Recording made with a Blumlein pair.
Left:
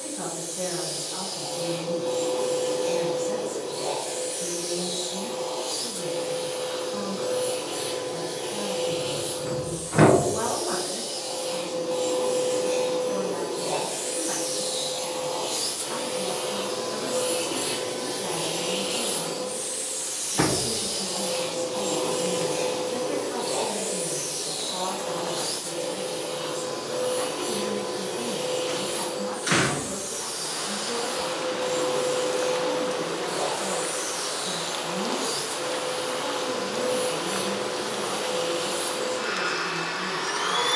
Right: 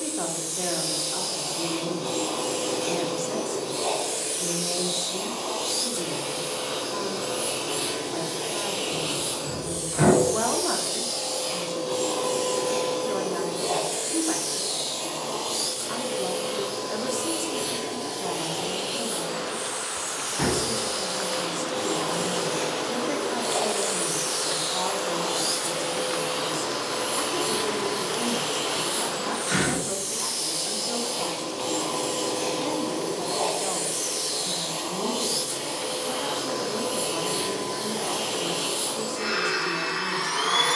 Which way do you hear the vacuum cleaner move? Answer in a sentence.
You can hear the vacuum cleaner go left and come back.